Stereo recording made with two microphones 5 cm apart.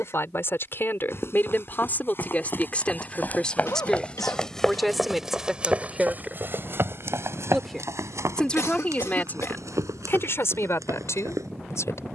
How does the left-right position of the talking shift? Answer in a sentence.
You can hear the talking go right and come back.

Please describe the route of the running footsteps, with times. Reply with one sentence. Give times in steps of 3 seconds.
You can hear the running footsteps on the left from 0 s, in the centre from 3 s and on the right from 6 s.